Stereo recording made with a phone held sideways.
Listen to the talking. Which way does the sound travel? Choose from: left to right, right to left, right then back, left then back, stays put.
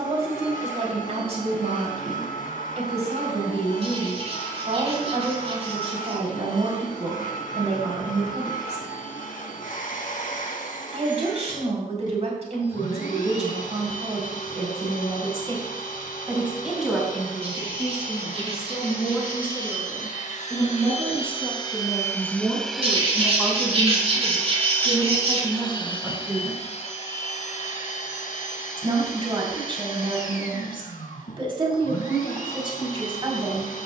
left then back.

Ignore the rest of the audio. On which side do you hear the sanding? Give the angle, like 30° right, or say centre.
50° right.